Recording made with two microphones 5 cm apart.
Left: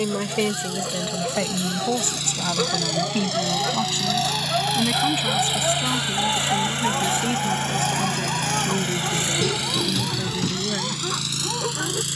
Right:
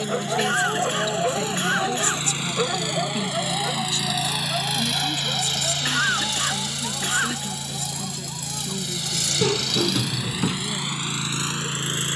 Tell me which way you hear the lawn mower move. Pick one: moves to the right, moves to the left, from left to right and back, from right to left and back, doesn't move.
from right to left and back.